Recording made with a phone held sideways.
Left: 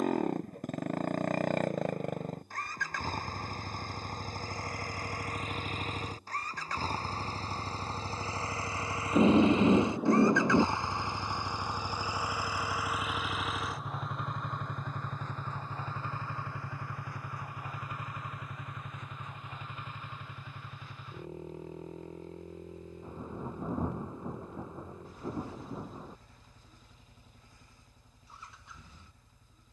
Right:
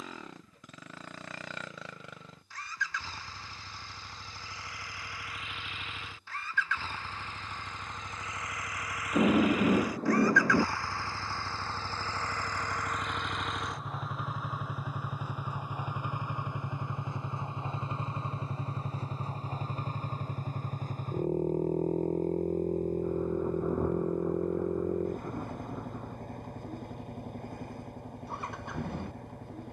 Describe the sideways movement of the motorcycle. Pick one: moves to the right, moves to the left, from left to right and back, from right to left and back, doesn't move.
moves to the right.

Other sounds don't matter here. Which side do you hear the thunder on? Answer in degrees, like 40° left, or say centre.
10° left.